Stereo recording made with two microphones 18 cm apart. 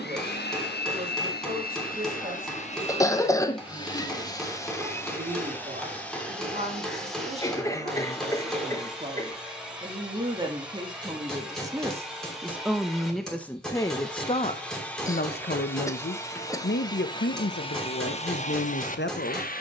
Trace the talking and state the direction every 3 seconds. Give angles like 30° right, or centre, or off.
40° right, 40° right, 40° right, 30° right, 10° left, 70° left, 80° left.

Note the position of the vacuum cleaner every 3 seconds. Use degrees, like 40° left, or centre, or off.
60° left, 20° left, centre, centre, centre, 20° left, 50° left.